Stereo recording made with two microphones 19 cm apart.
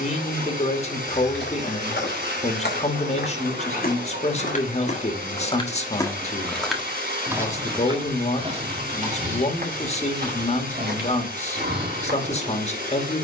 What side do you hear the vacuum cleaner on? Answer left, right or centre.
right.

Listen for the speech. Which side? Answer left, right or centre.
left.